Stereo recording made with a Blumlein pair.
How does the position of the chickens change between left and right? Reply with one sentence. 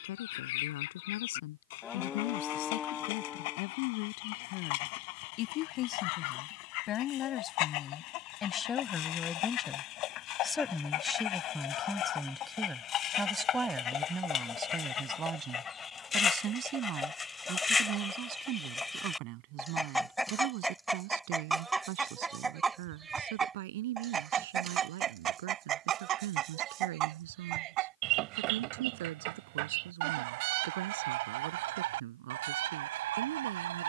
You can hear the chickens move to the right.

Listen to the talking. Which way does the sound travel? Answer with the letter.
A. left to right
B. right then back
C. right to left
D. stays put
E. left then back
A.